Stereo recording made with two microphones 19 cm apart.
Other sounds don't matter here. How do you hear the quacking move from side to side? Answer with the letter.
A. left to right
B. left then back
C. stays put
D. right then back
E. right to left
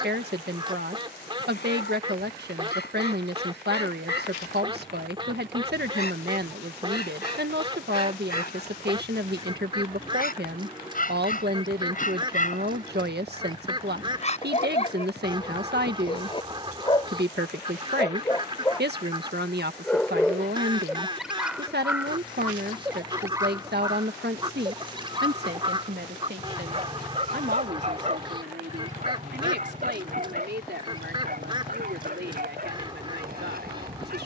C.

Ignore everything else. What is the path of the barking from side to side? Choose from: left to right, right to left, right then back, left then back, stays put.
left to right.